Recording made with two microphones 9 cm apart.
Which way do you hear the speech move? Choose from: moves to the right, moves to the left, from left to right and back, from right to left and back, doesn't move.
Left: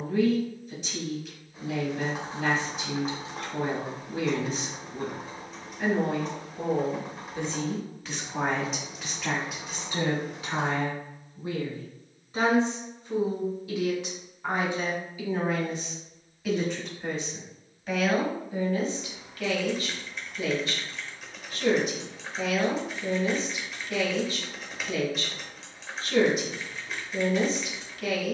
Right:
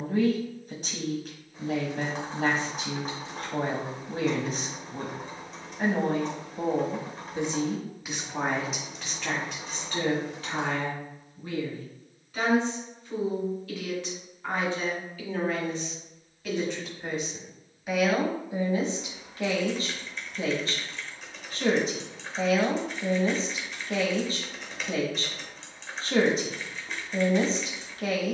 from right to left and back.